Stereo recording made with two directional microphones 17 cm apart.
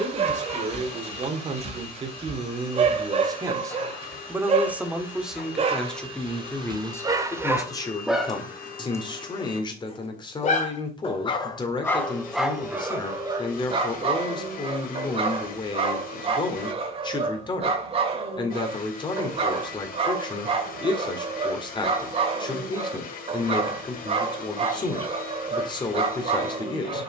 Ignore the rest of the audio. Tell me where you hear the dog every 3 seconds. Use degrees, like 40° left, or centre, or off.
40° right, 40° right, 20° right, 30° left, 20° right, 40° right, 40° right, 40° right, 40° right.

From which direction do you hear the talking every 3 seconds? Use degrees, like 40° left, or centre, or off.
40° right, 10° right, 20° left, 30° left, 30° left, 30° left, 30° left, 30° left, 30° left.